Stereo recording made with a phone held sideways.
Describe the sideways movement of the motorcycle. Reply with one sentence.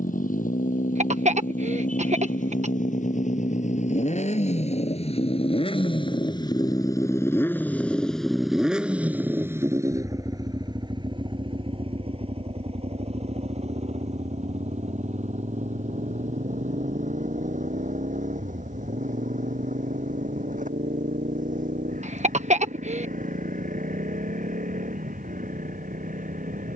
You can hear the motorcycle go from the left side to the right.